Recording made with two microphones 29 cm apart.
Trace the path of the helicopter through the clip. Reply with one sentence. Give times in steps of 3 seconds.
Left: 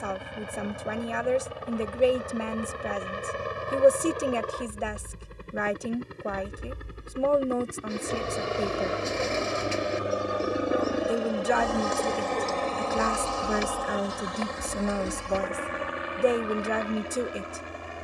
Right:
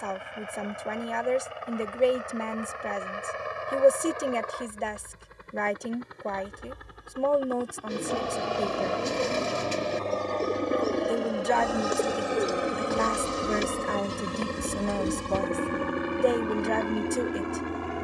You can hear the helicopter on the left from 0 s, in the centre from 9 s and on the right from 12 s.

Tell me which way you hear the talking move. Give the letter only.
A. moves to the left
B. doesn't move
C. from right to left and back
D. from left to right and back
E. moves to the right
B.